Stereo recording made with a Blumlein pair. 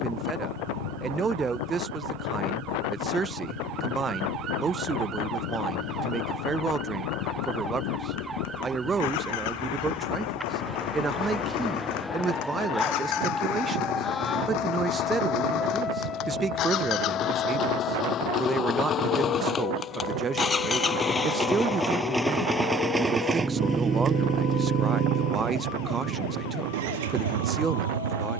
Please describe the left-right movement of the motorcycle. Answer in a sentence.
In this clip you hear the motorcycle move to the right.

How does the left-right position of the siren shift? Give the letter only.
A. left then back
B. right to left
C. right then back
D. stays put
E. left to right
B.